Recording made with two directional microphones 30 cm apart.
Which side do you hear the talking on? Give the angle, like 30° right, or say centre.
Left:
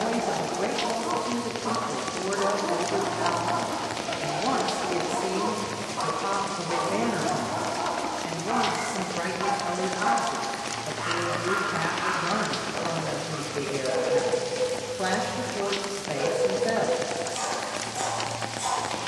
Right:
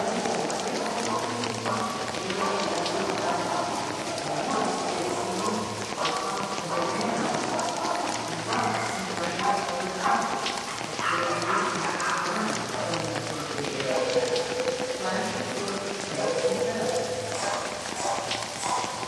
50° left.